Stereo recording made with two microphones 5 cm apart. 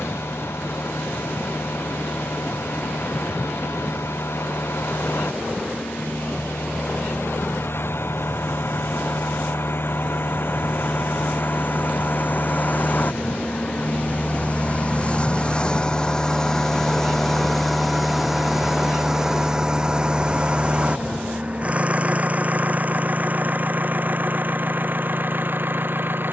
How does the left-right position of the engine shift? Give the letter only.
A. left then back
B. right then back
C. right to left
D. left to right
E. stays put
D.